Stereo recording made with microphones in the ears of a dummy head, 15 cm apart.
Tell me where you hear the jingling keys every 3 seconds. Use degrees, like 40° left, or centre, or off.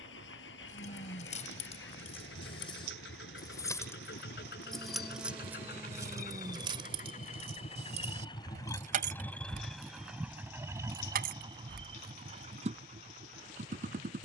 40° left, centre, 40° right, 60° right, off.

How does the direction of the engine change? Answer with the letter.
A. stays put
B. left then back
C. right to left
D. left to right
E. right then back
D.